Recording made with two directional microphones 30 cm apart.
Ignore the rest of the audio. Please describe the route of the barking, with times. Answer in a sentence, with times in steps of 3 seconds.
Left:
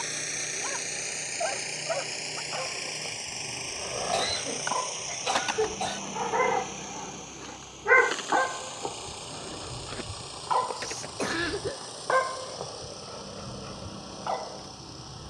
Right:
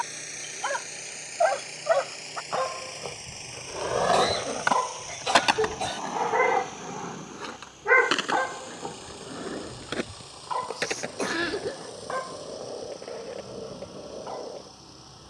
You can hear the barking on the right from 0 s, in the centre from 6 s and on the left from 9 s.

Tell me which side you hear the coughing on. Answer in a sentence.
You can hear the coughing in the centre.